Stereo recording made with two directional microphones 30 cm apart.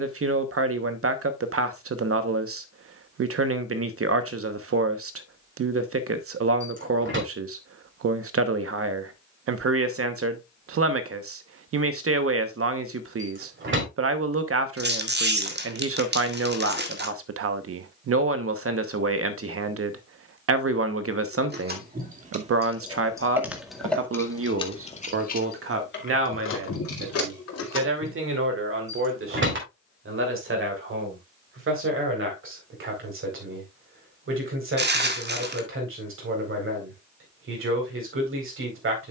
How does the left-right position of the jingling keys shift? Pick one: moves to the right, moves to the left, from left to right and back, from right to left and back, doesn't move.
moves to the left.